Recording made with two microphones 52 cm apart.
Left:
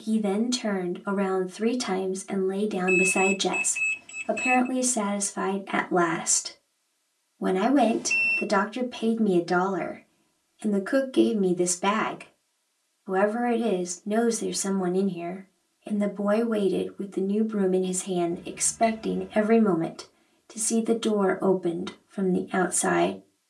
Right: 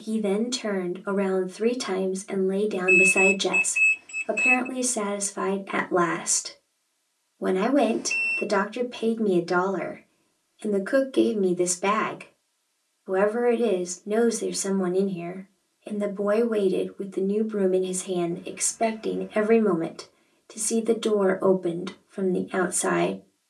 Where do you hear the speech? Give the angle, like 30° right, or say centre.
20° left.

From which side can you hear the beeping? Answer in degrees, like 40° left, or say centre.
60° left.